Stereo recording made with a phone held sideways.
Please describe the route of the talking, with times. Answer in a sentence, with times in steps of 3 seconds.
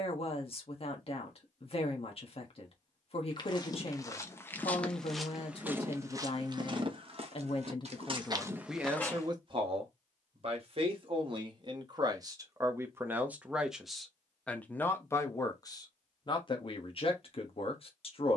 In this clip you hear the talking on the left from 0 s, on the right from 9 s, in the centre from 12 s and on the left from 15 s.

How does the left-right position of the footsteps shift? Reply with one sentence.
In this clip you hear the footsteps go right and come back.